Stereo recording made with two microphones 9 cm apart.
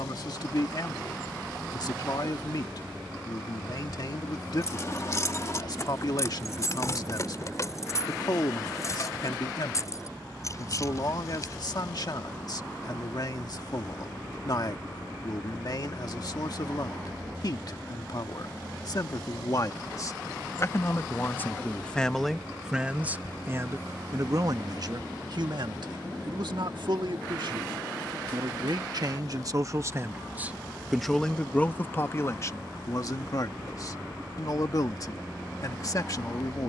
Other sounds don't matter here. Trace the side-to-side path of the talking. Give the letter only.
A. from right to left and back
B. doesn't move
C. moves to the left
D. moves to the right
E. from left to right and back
E.